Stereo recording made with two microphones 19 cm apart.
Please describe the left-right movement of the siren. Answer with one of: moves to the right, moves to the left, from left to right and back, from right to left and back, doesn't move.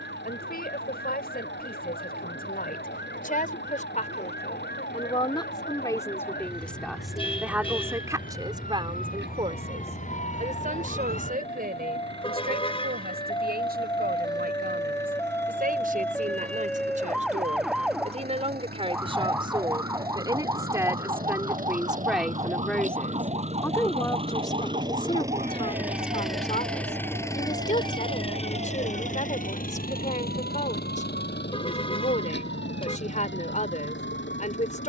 moves to the right.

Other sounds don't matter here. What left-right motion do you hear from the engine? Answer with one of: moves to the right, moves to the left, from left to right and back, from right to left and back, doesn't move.
moves to the left.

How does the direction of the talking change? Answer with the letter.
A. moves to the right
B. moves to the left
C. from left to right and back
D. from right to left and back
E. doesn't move
C.